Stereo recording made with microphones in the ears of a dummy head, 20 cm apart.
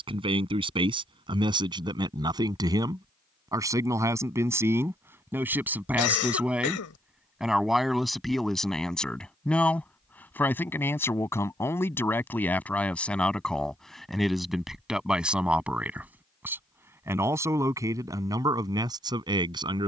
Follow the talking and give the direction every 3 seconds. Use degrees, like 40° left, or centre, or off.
20° right, 10° right, centre, 10° left, centre, 10° right, 20° right.